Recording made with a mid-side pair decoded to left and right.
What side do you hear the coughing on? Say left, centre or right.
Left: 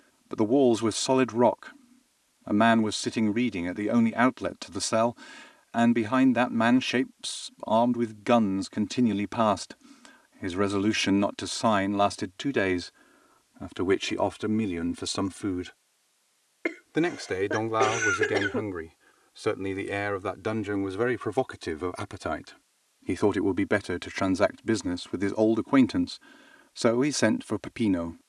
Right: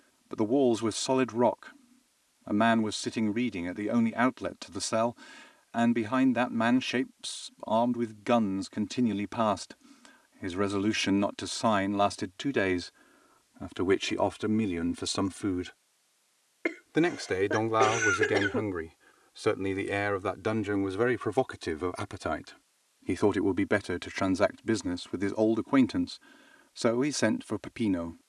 centre.